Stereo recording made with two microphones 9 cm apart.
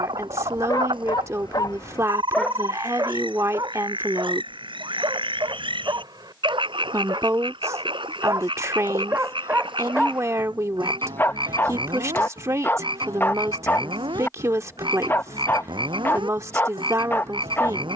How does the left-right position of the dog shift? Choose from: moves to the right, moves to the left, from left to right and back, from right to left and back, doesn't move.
from left to right and back.